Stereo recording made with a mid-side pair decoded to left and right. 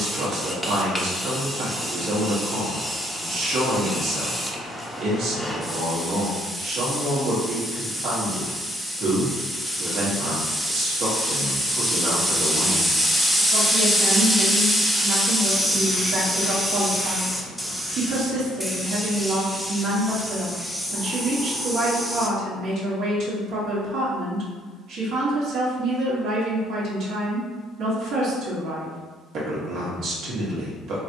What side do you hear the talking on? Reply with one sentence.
In this clip you hear the talking on the right.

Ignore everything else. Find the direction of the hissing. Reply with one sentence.
In this clip you hear the hissing in the centre.